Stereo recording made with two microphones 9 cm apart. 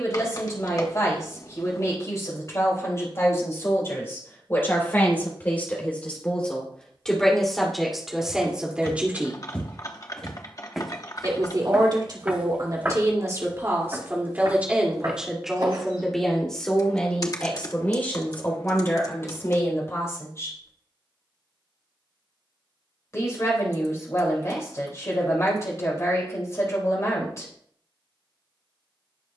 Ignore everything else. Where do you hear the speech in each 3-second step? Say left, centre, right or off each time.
left, left, centre, right, right, centre, left, left, left, left.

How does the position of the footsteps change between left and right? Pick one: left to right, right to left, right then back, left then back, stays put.
left to right.